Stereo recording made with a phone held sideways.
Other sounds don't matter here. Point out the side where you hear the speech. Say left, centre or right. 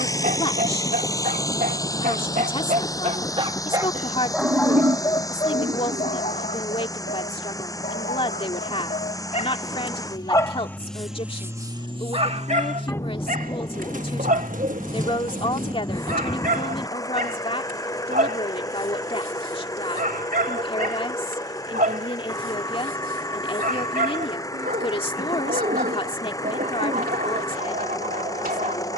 left.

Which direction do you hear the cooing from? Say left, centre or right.
right.